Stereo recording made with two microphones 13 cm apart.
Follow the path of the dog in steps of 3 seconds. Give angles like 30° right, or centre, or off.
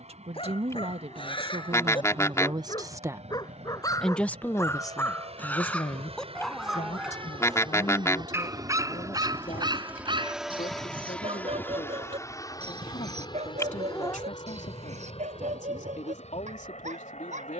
40° left, 20° left, 10° right, 40° right, 60° right, 70° right.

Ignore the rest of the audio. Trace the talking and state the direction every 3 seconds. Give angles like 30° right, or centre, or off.
50° right, 20° left, 70° left, 80° left, 80° left, 80° left.